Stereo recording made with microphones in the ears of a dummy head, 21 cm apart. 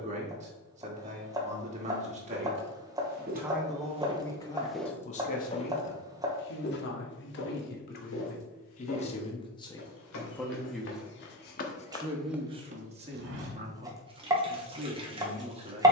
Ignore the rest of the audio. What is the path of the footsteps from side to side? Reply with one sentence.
In this clip you hear the footsteps move from right to left and back again.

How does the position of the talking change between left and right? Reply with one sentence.
You can hear the talking move from right to left and back again.